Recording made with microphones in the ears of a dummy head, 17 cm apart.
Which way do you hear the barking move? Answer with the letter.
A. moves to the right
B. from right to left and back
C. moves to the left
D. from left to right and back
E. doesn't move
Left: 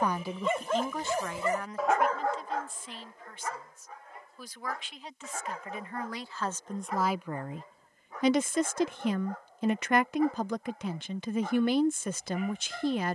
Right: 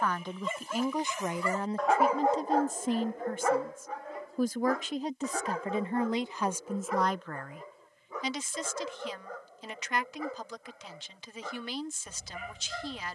A.